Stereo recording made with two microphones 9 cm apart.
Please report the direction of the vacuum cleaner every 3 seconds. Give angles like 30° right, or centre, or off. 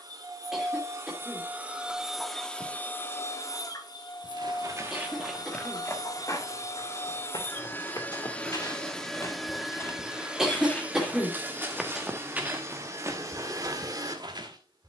20° right, 40° left, 20° left, 10° right, 40° right.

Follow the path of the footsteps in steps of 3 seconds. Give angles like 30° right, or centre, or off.
off, 10° right, 40° left, 20° left, 30° right.